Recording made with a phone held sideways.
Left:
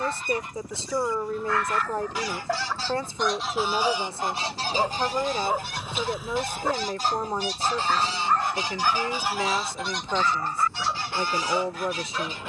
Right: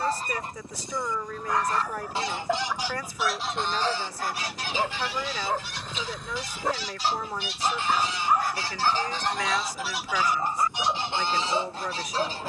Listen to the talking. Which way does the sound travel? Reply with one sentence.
In this clip you hear the talking stay put.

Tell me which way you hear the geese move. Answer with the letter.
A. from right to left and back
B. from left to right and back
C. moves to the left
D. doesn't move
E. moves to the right
A.